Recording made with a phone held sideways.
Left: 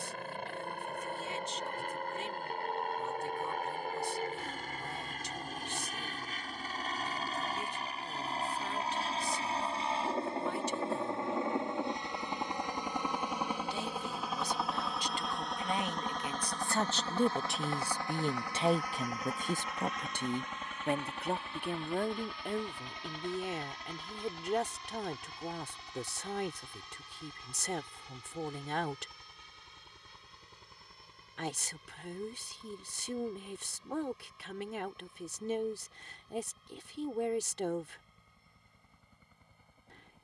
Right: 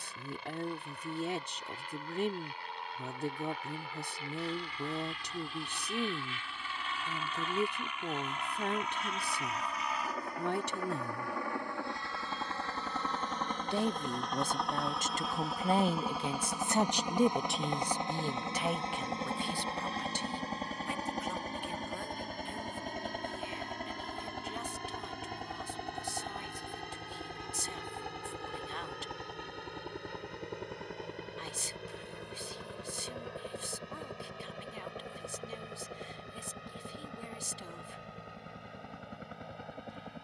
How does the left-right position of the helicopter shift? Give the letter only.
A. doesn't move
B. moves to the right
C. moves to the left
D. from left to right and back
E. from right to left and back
B.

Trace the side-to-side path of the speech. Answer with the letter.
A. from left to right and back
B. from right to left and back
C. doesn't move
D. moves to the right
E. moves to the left
E.